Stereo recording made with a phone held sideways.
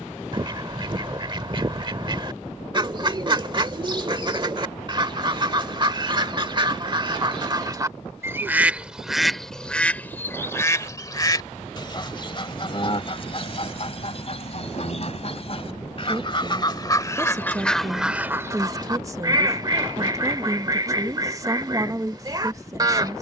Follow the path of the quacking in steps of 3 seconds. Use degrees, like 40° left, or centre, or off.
30° right, 30° right, 30° right, 20° left, 40° left, 30° left, 30° right, 30° right.